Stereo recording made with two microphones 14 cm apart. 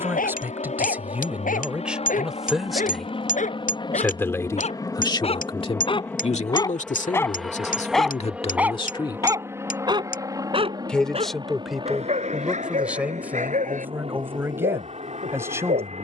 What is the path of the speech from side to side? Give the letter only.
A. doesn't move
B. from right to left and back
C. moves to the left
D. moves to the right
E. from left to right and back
B.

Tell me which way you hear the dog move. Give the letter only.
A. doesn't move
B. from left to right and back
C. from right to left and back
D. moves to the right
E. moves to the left
D.